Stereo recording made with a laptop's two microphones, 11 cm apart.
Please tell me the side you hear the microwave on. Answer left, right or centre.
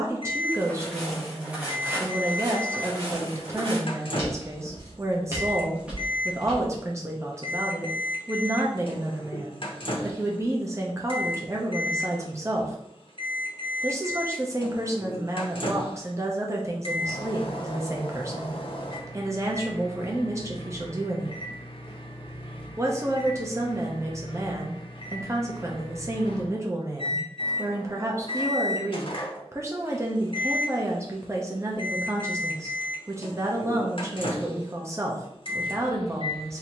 left.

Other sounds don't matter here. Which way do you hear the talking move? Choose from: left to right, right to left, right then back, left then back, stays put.
stays put.